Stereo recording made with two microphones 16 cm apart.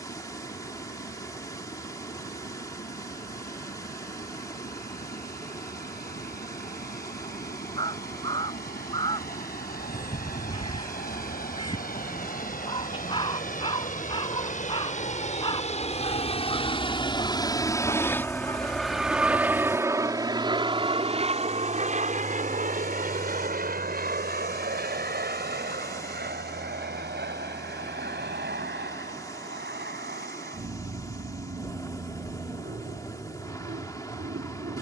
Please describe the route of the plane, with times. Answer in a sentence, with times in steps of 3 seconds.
In this clip you hear the plane on the left from 0 s, in the centre from 18 s and on the right from 21 s.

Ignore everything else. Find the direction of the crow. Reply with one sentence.
In this clip you hear the crow on the left.